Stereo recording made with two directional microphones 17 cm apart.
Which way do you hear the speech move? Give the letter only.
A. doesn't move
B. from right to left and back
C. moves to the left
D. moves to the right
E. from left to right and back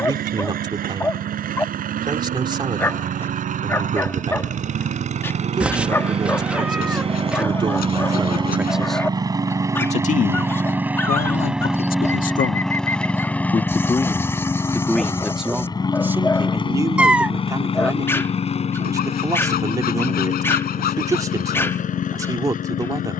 B.